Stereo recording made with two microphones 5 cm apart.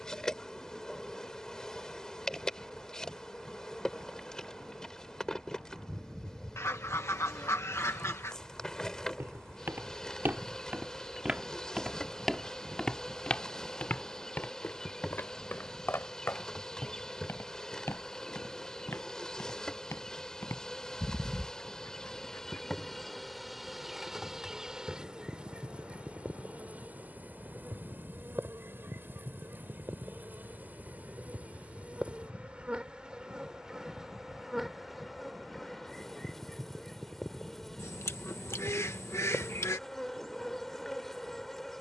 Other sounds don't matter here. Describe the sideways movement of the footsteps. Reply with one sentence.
In this clip you hear the footsteps travel towards the left.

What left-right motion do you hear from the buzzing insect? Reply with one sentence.
You can hear the buzzing insect move from left to right and back again.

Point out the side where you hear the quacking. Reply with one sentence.
In this clip you hear the quacking on the left.